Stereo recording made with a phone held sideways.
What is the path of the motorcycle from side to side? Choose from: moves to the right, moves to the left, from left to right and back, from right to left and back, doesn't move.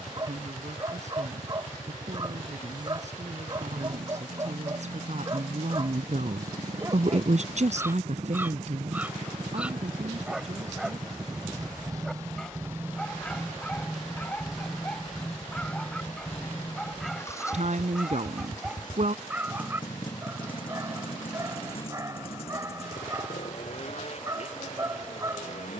moves to the left.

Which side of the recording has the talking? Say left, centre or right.
right.